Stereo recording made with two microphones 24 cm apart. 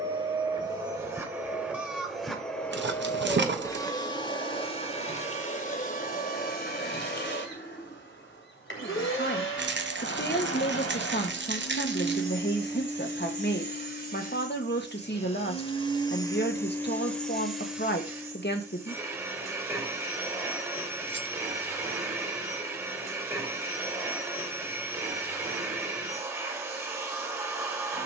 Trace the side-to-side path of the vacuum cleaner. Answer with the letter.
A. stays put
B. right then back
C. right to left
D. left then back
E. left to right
D.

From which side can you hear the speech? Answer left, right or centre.
left.